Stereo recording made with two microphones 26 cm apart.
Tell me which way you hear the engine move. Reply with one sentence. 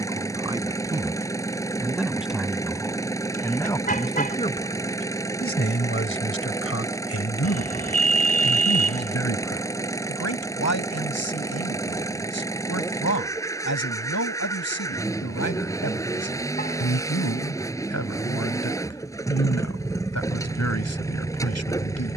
You can hear the engine stay in one place.